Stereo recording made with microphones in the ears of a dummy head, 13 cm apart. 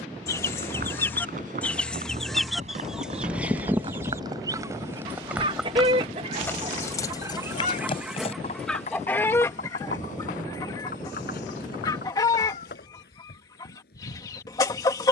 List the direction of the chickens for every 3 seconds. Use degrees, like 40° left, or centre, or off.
10° left, 20° right, 20° right, 20° left, 20° left.